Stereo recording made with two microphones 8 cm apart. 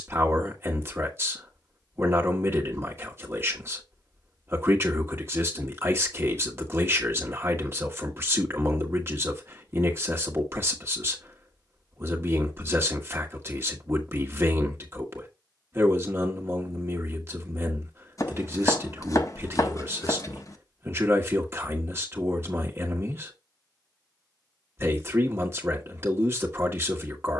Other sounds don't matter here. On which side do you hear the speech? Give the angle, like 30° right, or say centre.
30° right.